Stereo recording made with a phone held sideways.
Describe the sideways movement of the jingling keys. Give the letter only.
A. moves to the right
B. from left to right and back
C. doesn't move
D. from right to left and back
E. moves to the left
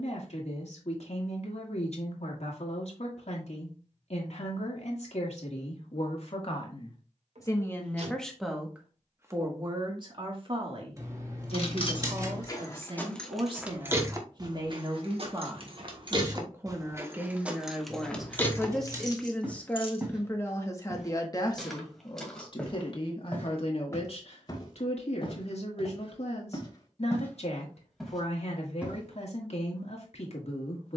B.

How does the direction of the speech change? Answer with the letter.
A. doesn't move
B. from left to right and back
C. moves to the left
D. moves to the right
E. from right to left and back
B.